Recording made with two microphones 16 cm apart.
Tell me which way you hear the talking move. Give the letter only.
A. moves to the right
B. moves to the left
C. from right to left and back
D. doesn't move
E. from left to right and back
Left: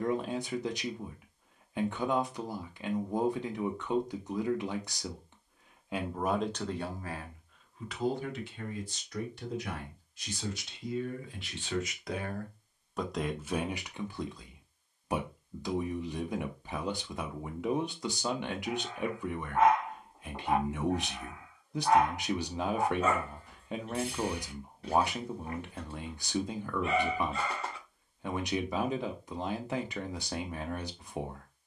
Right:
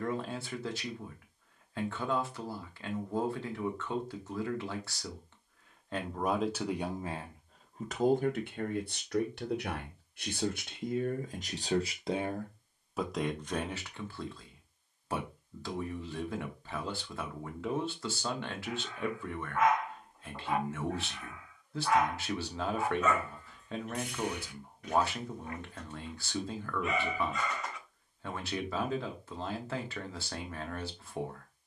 E.